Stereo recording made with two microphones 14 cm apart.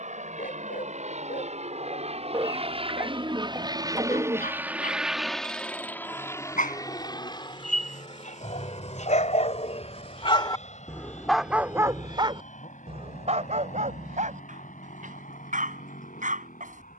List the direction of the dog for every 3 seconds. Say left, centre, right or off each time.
left, left, left, left, right, right.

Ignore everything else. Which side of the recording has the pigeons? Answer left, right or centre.
right.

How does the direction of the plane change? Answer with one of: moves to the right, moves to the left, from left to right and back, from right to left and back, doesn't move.
moves to the left.